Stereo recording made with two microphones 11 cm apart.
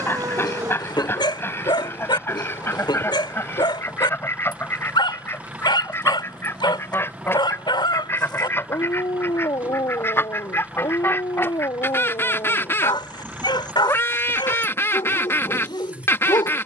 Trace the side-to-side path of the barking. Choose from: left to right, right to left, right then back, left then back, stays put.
stays put.